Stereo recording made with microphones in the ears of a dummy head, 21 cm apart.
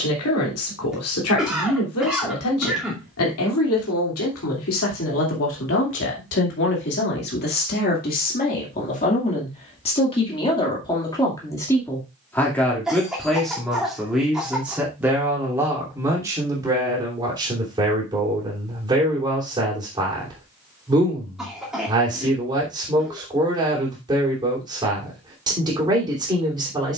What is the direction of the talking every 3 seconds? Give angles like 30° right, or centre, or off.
70° left, 60° left, 40° left, 20° left, centre, 10° right, 20° right, 20° right, 20° right.